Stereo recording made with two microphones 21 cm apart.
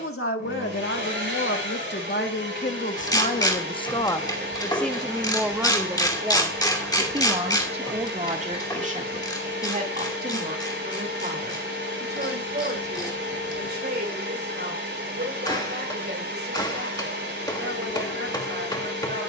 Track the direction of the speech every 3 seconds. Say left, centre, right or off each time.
left, centre, right, right, right, right, right.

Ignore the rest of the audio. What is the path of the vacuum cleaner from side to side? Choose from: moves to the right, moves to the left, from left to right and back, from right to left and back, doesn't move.
doesn't move.